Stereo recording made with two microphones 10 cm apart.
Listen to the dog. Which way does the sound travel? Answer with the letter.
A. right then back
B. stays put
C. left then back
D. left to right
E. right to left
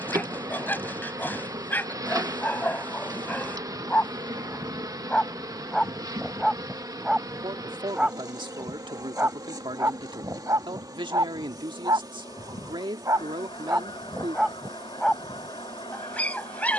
A.